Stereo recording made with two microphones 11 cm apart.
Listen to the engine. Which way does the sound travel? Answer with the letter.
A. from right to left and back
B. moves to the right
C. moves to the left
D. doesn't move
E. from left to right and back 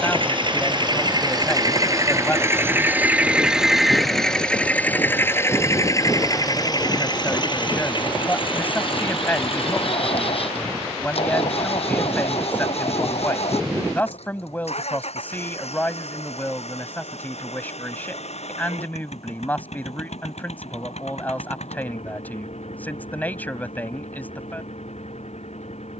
C.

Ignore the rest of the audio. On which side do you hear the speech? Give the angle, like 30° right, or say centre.
20° left.